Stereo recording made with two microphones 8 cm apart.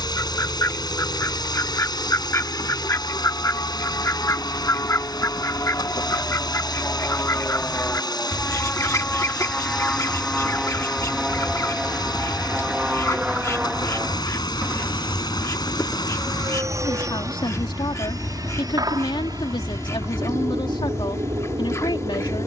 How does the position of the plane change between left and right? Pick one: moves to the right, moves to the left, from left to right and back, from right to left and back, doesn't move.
moves to the right.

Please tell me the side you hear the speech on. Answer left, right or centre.
left.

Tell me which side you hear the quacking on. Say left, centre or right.
left.